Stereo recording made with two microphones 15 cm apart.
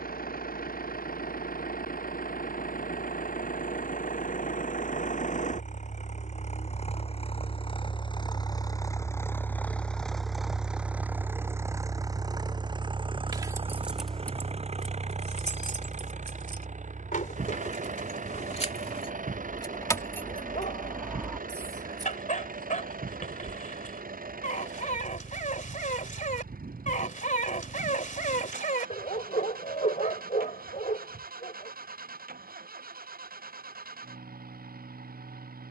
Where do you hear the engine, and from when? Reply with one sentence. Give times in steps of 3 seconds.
You can hear the engine on the left from 0 s, in the centre from 9 s and on the right from 12 s.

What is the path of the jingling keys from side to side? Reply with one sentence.
You can hear the jingling keys go left and come back.